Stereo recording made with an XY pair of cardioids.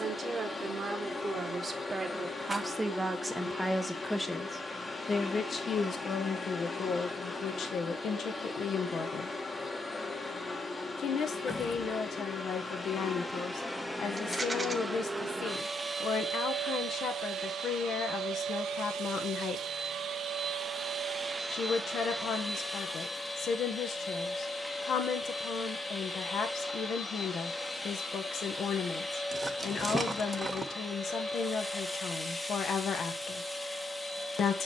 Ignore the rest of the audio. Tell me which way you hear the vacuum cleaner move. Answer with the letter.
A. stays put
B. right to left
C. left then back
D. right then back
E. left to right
D.